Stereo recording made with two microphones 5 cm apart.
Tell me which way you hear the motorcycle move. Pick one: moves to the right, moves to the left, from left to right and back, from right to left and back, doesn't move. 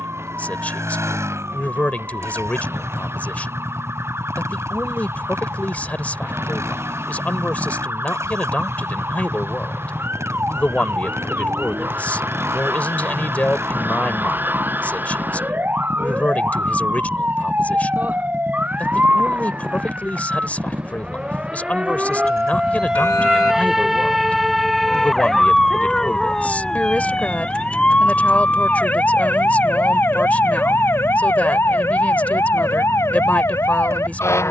doesn't move.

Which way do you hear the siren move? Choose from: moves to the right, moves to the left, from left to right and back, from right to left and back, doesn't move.
moves to the left.